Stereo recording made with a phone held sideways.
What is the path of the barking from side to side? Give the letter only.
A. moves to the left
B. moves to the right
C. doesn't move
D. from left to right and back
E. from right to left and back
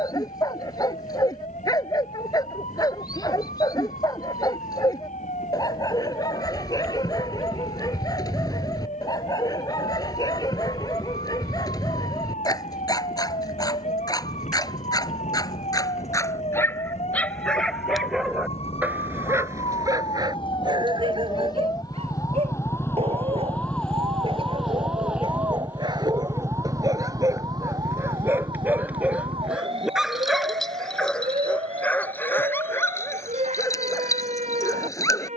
D.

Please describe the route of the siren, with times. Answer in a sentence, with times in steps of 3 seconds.
In this clip you hear the siren on the left from 0 s, in the centre from 24 s and on the right from 27 s.